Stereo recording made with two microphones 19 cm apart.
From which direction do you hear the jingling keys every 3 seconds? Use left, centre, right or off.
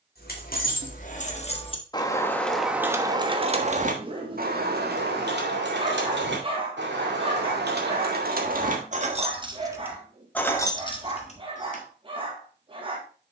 left, right, right, centre, off.